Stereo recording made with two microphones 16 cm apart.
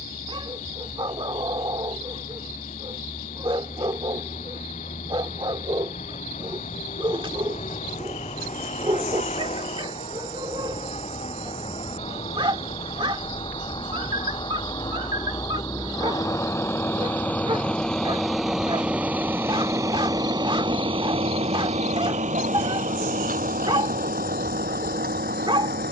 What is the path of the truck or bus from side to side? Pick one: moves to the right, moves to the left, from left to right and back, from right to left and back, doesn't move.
moves to the right.